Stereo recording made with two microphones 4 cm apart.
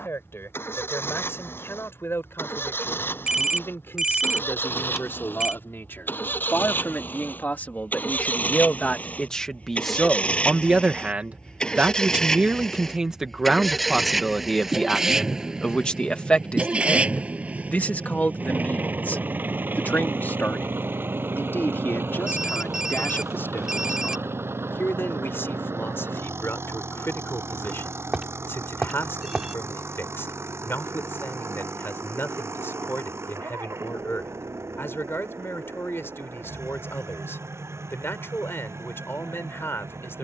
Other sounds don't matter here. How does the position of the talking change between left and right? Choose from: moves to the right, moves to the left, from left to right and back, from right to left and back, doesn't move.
from left to right and back.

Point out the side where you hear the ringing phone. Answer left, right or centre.
centre.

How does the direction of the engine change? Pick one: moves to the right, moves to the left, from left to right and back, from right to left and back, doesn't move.
moves to the right.